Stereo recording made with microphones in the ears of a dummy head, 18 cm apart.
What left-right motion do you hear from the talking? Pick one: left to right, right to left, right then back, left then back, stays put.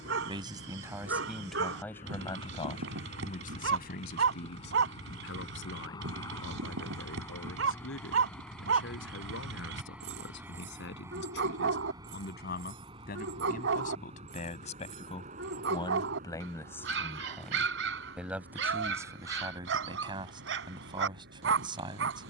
left then back.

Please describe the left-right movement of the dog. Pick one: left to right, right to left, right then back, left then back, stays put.
stays put.